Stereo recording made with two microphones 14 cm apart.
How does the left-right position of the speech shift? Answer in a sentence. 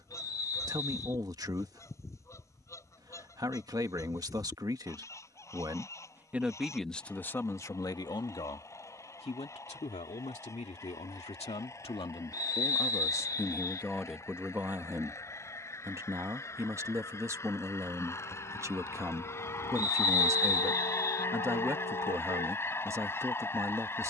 You can hear the speech go left and come back.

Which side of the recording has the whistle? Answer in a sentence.
You can hear the whistle on the left.